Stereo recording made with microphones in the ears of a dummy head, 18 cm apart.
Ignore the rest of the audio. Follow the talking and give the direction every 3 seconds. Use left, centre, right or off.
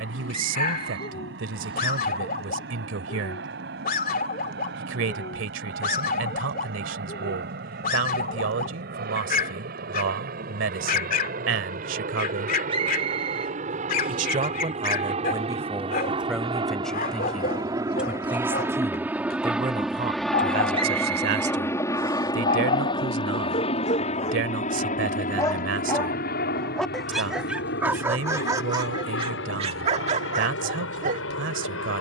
right, right, right, right, right, centre, right, right, right, right, right.